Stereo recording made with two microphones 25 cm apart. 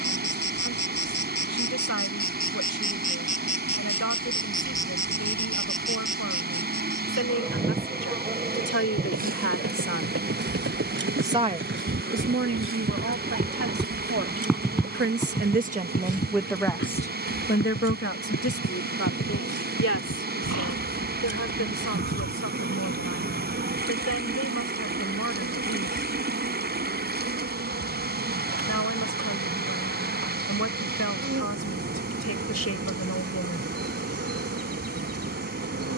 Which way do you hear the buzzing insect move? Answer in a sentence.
You can hear the buzzing insect go from the left side to the right.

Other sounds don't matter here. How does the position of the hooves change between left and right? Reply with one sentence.
You can hear the hooves move from right to left.